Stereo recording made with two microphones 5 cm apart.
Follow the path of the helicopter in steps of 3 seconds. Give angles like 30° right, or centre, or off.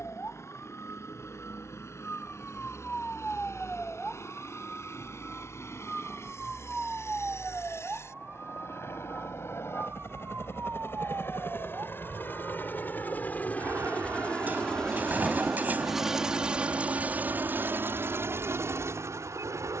60° left, 60° left, 60° left, 50° left, 30° left, 20° right, 60° right.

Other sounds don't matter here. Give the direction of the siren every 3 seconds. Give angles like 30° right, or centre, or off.
30° left, 10° left, 20° right, 40° right, 60° right, 60° right, 70° right.